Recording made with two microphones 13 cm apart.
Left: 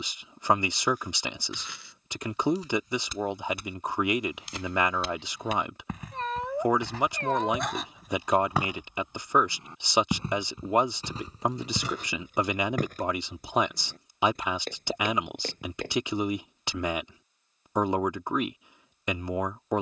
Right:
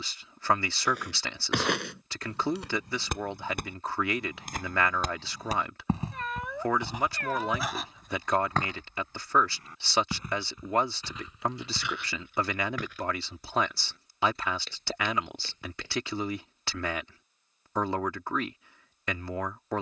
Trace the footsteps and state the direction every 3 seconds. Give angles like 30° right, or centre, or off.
70° right, 50° right, 10° right, 30° left, 50° left, 50° left, off.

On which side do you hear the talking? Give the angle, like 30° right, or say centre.
20° left.